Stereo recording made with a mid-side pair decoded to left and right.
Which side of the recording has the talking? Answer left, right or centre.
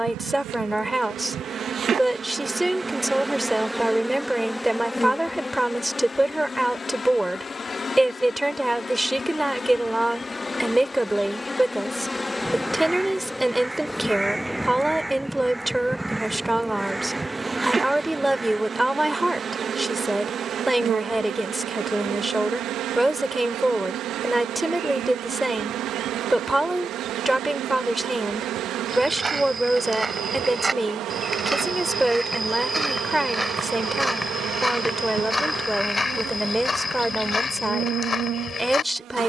centre.